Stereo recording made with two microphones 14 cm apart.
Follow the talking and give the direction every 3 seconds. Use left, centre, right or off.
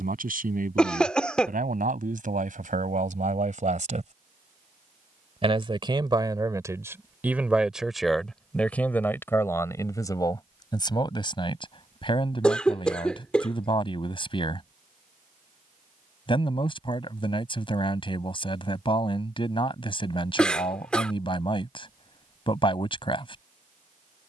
right, right, centre, left, left, left, left, left.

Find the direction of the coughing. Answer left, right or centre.
centre.